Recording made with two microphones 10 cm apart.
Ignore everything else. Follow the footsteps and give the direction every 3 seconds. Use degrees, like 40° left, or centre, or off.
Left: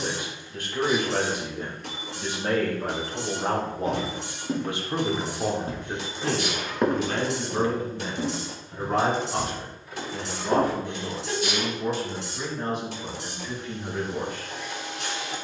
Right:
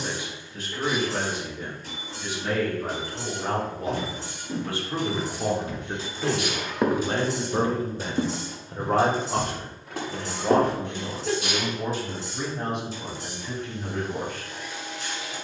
off, 50° left, 20° right, 70° right, off.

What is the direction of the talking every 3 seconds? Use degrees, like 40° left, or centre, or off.
50° left, 20° left, 30° right, 60° right, 70° right.